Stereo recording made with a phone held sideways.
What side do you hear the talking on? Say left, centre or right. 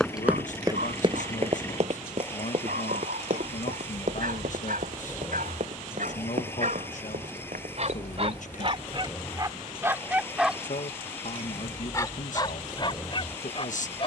left.